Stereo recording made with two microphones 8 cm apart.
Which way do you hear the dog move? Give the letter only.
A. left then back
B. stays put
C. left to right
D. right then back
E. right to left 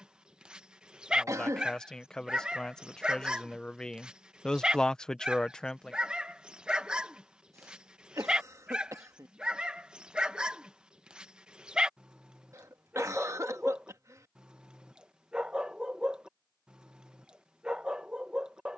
B.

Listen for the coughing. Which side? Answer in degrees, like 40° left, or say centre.
40° right.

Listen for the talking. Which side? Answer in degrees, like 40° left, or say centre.
10° left.